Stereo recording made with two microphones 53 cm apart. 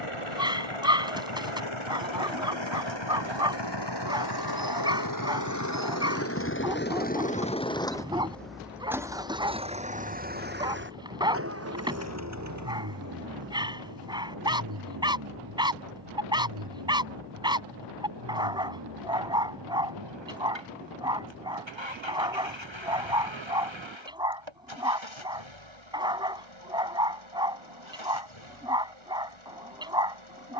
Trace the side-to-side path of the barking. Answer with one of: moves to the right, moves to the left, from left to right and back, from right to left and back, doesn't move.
doesn't move.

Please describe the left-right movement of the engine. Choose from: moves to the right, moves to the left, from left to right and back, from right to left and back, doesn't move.
moves to the right.